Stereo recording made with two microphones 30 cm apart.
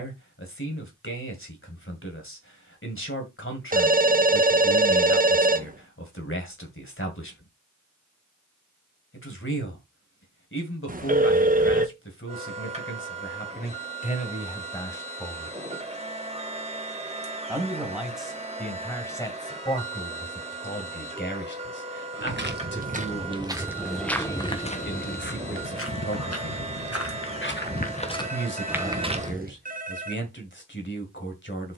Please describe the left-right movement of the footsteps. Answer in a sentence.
You can hear the footsteps go left and come back.